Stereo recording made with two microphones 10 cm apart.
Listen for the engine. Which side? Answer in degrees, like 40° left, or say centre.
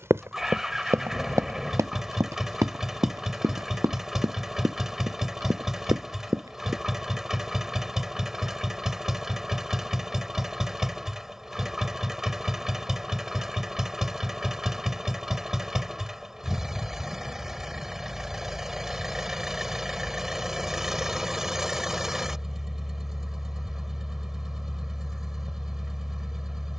centre.